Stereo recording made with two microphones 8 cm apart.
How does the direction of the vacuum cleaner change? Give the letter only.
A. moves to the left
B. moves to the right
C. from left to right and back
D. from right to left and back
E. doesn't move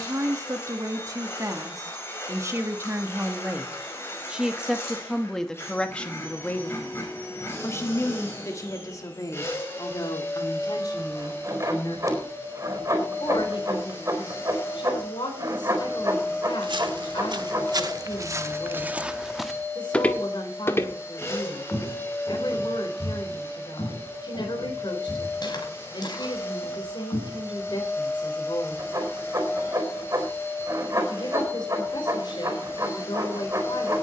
E.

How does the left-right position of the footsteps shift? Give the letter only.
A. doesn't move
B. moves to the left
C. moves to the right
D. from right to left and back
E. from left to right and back
B.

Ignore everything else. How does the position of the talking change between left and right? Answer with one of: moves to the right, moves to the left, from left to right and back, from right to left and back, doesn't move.
moves to the left.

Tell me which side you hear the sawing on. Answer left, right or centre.
right.